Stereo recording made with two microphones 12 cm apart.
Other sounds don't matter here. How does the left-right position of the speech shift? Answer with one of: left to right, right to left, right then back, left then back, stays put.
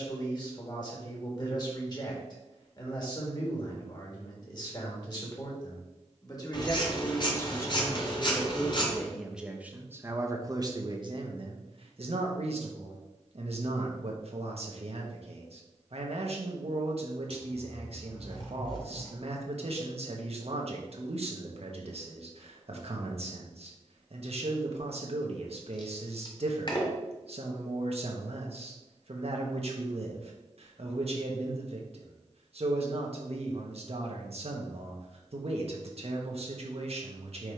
left to right.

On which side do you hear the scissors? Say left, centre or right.
left.